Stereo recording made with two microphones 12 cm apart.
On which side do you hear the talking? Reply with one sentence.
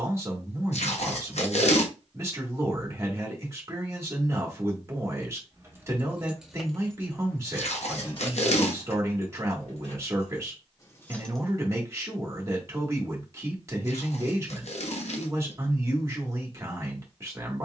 You can hear the talking on the right.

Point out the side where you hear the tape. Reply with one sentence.
In this clip you hear the tape on the left.